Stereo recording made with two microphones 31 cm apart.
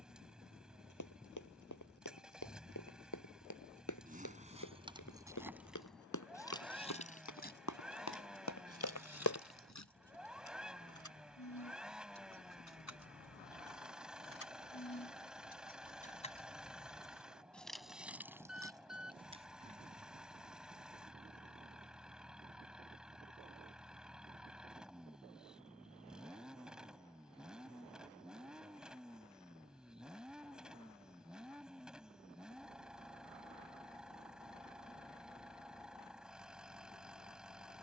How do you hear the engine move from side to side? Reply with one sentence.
You can hear the engine stay put.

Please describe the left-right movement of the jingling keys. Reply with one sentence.
You can hear the jingling keys go left and come back.